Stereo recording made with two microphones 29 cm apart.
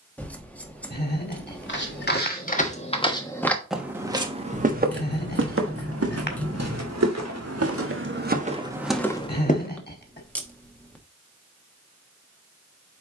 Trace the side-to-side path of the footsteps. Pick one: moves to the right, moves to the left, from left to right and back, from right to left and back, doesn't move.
from left to right and back.